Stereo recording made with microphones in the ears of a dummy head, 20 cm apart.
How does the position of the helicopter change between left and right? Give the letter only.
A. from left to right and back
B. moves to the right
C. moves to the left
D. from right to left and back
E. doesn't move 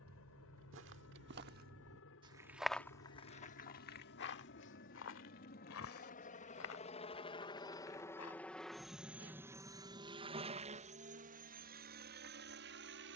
B.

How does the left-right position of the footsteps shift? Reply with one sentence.
In this clip you hear the footsteps move to the left.